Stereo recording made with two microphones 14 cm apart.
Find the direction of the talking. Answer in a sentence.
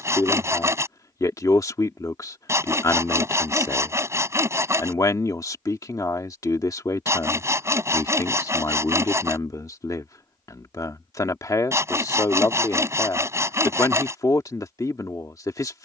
In this clip you hear the talking on the left.